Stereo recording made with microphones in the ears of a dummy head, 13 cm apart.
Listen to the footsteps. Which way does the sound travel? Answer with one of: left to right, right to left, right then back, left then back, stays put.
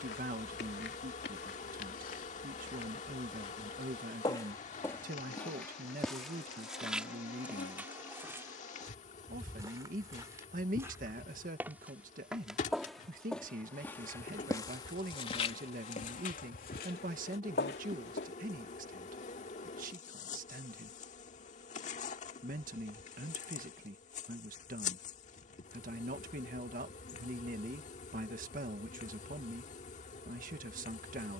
right then back.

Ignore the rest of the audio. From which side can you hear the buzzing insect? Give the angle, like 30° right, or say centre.
50° left.